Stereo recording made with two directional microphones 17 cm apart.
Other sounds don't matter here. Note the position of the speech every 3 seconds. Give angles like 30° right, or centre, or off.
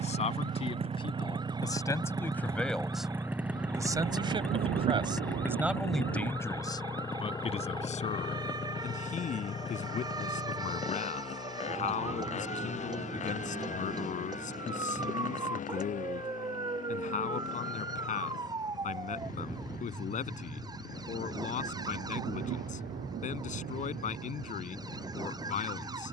20° left, 20° right, 30° left, 50° left, 50° left, 50° left, 50° left, 50° left, 50° left.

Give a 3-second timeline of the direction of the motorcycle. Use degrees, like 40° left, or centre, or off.
30° right, centre, 20° left, 40° left, 40° left, 50° left, 50° left, 60° left, 60° left.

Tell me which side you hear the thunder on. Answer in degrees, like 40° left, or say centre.
70° right.